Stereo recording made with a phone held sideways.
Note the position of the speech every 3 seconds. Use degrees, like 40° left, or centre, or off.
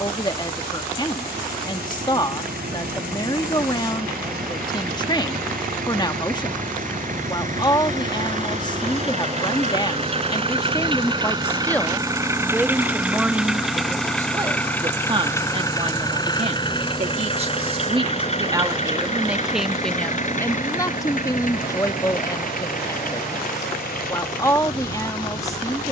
30° left, 30° left, 30° left, 20° left, 10° right, 40° right, centre, 20° left, 20° left.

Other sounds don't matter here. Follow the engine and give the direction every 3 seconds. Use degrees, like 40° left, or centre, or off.
70° right, 60° right, 50° right, 30° right, centre, 30° left, 50° left, 60° left, 60° left.